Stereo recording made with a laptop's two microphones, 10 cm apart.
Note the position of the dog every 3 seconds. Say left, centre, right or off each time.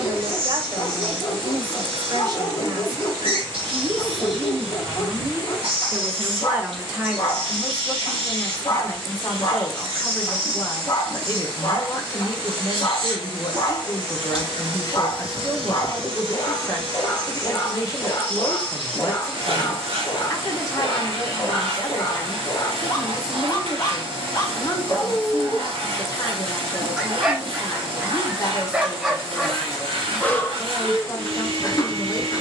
left, left, left, left, left, left, left, left, left, centre, left.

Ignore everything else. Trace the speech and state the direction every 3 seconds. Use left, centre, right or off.
right, right, centre, left, left, left, left, left, left, left, left.